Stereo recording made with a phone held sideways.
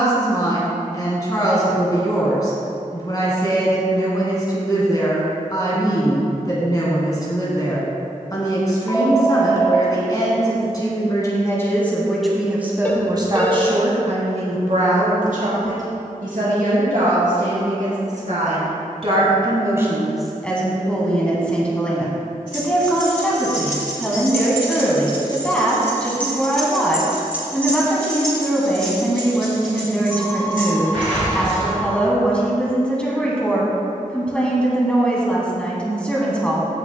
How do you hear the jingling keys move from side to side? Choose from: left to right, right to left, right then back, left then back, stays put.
left to right.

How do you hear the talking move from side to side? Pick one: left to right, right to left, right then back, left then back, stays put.
right then back.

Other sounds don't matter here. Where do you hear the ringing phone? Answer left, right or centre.
centre.